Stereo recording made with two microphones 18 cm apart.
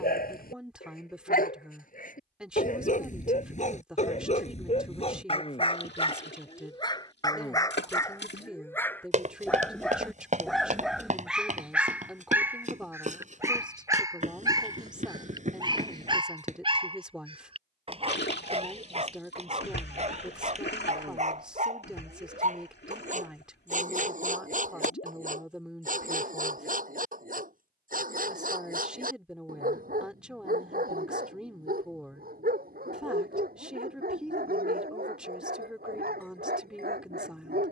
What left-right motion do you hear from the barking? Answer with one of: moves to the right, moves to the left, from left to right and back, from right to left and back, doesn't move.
moves to the right.